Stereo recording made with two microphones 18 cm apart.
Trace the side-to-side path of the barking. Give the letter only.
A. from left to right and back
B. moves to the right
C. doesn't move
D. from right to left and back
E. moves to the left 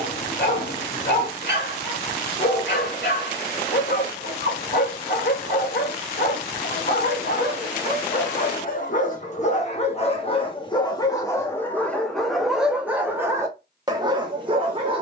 B.